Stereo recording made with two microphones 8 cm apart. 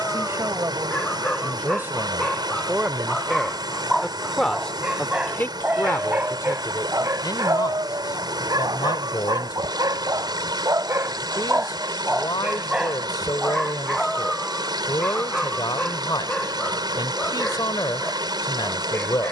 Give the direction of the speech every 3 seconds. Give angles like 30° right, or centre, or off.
30° right, 10° left, 50° left, 60° left, 60° left, 60° left, 60° left.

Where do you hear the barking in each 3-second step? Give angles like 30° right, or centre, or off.
10° left, 10° right, 40° right, 40° right, 10° right, 10° left, 20° left.